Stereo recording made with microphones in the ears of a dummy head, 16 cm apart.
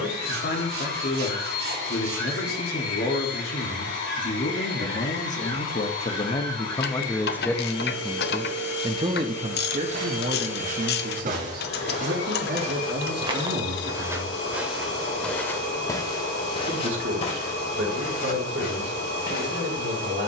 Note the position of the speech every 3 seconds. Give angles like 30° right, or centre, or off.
60° left, 50° left, 10° left, 50° right, 70° right, 80° right, 80° right.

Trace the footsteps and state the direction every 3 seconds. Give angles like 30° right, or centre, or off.
off, off, off, 50° right, 20° right, 30° left, 60° left.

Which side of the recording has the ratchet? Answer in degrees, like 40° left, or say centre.
60° left.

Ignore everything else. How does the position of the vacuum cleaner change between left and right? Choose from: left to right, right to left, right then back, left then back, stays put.
stays put.